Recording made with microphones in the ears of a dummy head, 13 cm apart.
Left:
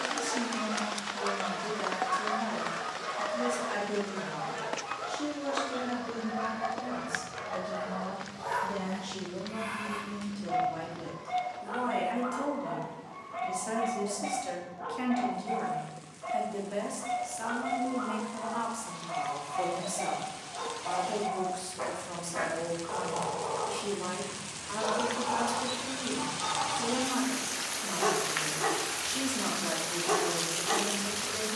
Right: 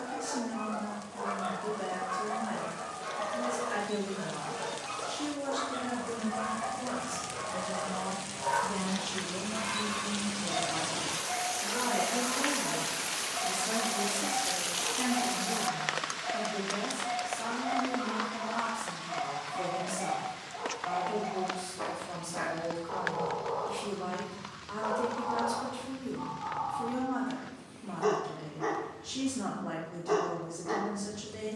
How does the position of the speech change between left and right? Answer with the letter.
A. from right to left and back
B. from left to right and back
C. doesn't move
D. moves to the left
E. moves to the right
B.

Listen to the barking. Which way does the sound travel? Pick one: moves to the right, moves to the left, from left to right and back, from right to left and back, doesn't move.
from left to right and back.